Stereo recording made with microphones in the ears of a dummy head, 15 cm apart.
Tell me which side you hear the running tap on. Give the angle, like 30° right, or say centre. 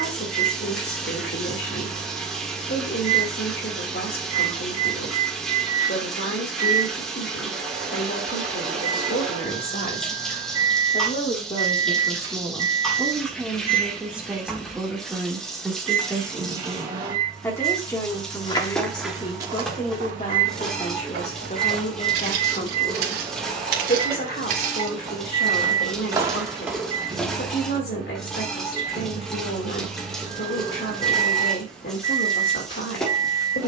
centre.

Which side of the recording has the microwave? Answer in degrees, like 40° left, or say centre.
20° right.